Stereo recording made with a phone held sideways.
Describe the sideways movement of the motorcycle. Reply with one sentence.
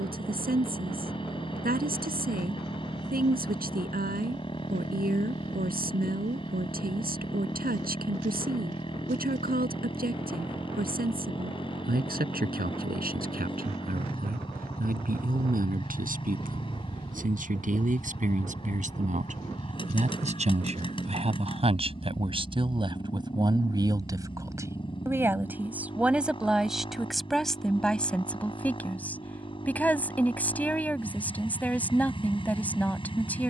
You can hear the motorcycle stay in one place.